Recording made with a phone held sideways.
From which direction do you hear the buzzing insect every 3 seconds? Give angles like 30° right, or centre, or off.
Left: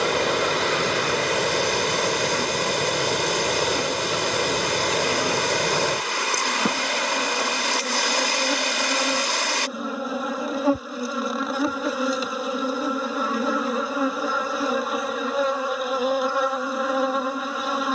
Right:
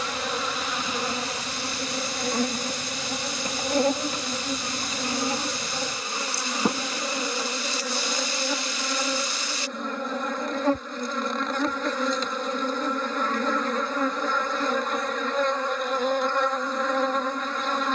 30° right, 40° right, centre, 10° left, 10° left, 10° left.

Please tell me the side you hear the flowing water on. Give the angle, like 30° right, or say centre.
80° left.